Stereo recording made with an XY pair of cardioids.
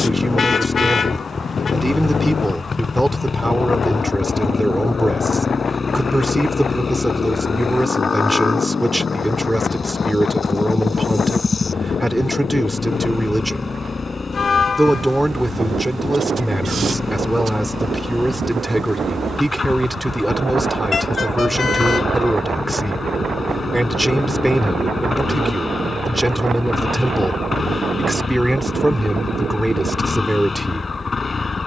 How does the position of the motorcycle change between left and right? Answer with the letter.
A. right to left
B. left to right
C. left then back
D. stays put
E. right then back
D.